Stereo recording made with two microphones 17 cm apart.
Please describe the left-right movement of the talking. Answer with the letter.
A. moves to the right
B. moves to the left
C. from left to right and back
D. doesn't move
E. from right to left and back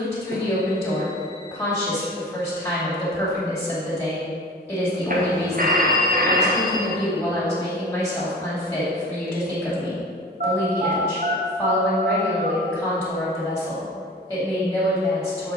D.